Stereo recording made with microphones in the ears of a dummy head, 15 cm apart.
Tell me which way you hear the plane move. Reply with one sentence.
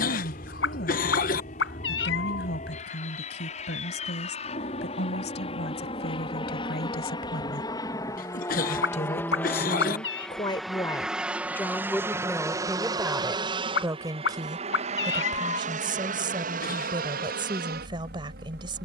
In this clip you hear the plane move from left to right.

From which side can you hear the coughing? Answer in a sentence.
You can hear the coughing on the left.